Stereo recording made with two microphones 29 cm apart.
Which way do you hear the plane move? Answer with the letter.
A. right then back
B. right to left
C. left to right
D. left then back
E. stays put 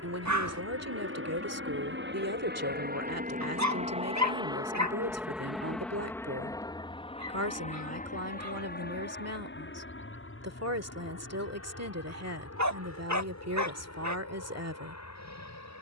B.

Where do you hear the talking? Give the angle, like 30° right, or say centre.
60° right.